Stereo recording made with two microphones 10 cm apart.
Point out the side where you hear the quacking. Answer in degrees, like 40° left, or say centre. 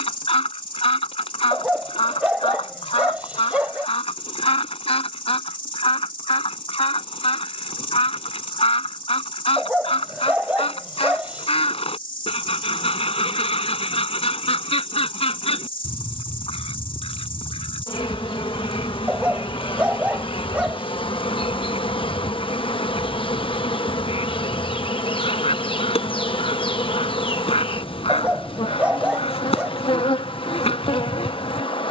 70° left.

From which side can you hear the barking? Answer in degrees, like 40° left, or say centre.
10° right.